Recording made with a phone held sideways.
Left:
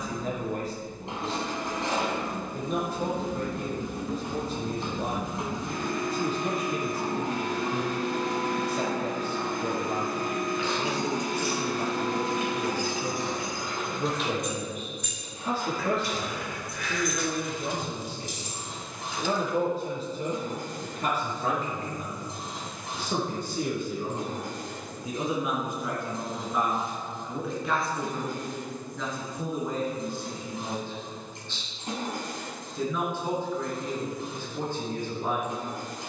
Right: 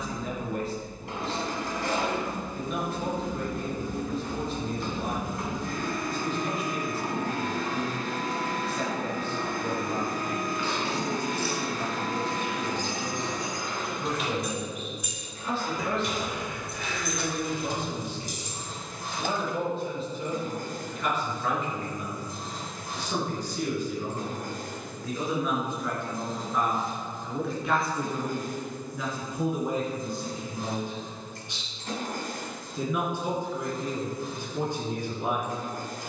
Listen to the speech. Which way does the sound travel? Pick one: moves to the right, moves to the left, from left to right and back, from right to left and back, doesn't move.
moves to the right.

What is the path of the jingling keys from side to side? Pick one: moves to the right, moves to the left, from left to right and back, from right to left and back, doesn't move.
moves to the right.